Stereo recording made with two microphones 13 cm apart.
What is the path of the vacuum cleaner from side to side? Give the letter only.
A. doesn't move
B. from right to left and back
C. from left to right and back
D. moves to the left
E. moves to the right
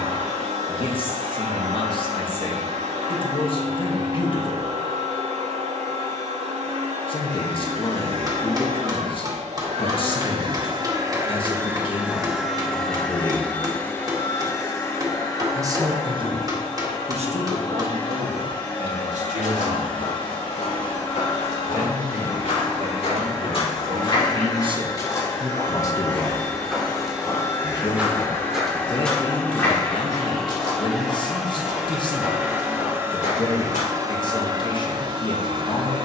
B.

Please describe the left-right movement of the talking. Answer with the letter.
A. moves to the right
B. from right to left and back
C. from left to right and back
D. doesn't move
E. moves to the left
C.